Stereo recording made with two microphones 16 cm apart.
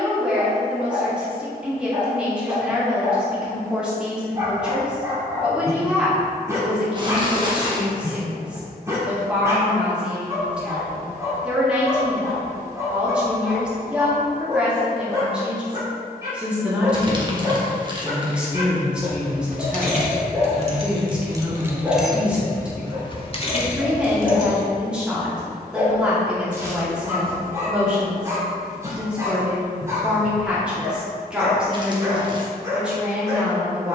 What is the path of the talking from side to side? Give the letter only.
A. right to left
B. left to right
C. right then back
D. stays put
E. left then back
D.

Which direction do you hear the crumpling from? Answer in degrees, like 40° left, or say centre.
30° right.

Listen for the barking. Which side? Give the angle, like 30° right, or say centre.
20° right.